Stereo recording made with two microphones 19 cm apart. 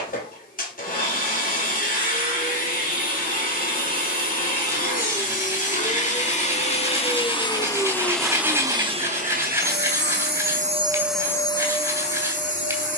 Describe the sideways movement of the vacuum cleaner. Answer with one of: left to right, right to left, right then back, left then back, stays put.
right then back.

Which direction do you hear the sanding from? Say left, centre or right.
centre.